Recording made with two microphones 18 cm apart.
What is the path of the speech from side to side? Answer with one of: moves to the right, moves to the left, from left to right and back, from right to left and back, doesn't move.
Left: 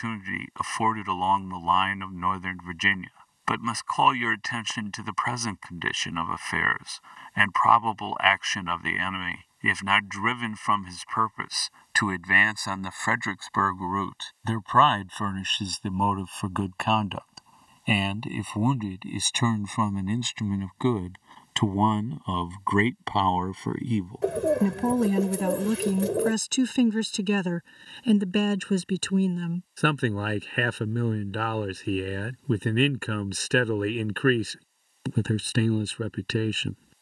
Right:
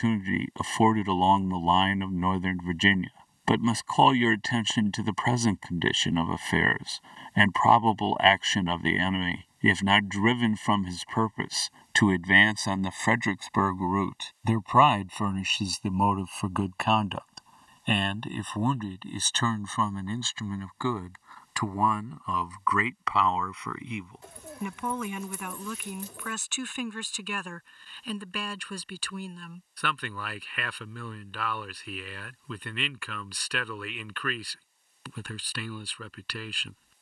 moves to the left.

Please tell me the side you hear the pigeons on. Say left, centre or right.
left.